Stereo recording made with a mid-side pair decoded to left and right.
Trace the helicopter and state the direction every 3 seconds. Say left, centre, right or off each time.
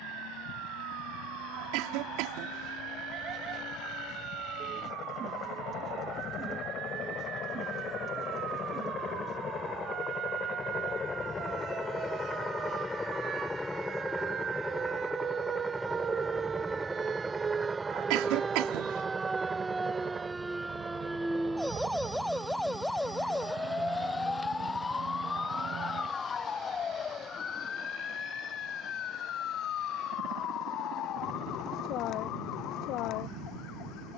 left, left, left, left, centre, centre, right, right, right, right, right, right.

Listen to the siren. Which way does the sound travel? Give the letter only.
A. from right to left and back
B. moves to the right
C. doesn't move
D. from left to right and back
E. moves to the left
E.